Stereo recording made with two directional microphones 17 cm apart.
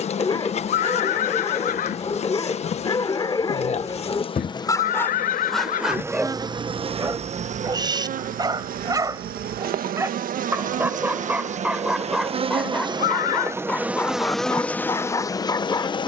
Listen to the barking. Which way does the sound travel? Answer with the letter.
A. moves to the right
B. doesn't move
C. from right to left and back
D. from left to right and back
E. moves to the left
D.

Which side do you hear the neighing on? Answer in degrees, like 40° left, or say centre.
50° left.